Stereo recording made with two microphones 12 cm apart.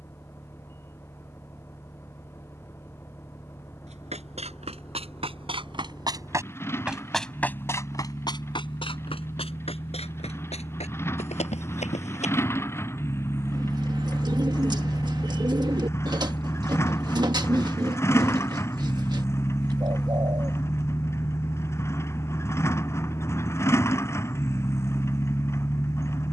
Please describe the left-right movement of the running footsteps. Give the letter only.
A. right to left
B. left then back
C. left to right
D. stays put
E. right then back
A.